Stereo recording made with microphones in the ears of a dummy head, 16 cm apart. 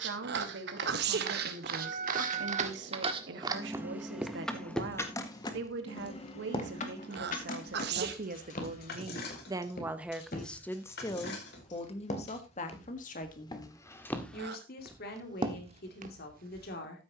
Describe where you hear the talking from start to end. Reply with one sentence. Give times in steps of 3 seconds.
You can hear the talking on the right from 0 s, in the centre from 9 s and on the left from 12 s.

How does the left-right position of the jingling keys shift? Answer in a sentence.
You can hear the jingling keys move from right to left.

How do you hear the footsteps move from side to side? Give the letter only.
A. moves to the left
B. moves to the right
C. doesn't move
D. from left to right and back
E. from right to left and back
E.